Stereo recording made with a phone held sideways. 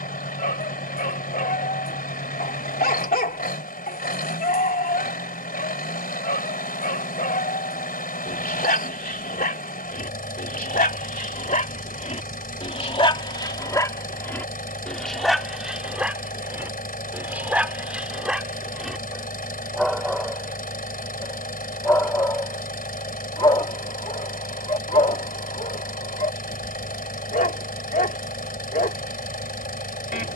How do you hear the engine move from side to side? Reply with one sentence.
In this clip you hear the engine stay in one place.